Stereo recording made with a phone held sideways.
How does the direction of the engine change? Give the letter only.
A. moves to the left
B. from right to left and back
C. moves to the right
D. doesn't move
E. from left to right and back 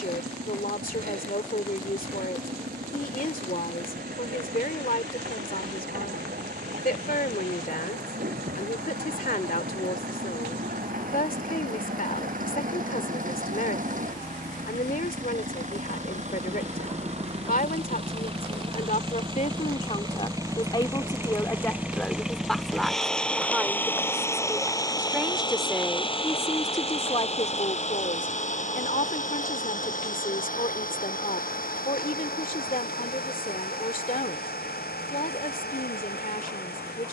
A.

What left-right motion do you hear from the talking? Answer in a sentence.
You can hear the talking go right and come back.